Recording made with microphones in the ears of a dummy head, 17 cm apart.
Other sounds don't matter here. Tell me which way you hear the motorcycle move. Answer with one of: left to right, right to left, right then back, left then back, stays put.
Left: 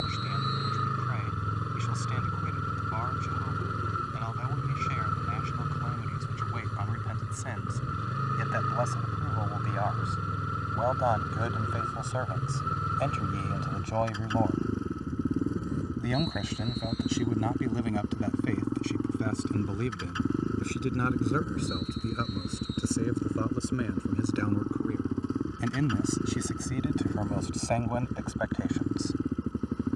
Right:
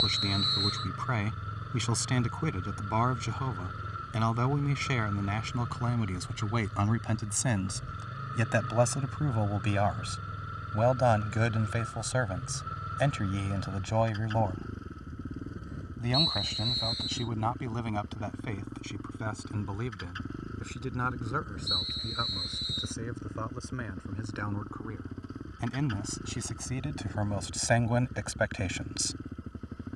stays put.